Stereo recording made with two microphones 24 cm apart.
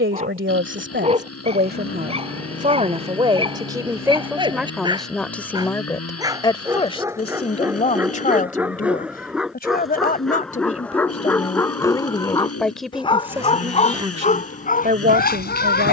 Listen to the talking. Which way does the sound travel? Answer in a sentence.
You can hear the talking move from right to left and back again.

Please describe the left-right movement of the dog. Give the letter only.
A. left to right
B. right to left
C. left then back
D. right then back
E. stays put
B.